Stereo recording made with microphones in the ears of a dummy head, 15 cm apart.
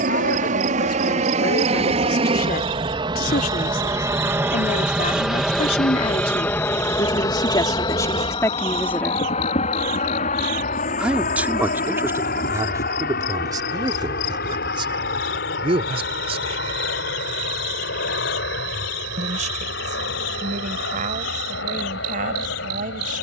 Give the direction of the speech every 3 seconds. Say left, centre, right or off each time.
left, left, left, centre, right, right, right, right.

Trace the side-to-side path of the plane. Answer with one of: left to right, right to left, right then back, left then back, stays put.
right to left.